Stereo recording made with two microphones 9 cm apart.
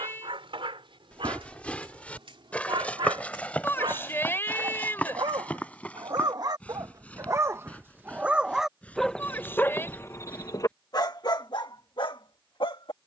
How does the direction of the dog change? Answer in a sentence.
In this clip you hear the dog travel towards the left.